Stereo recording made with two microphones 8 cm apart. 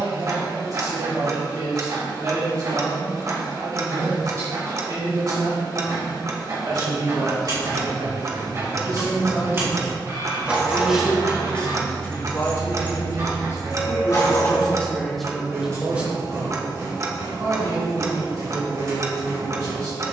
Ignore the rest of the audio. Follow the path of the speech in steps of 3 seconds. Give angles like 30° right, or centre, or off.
50° right, 50° right, 50° right, 10° right, 30° left, 20° right, 50° right.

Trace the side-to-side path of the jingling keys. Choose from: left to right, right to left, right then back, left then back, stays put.
right to left.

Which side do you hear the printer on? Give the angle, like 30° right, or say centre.
40° right.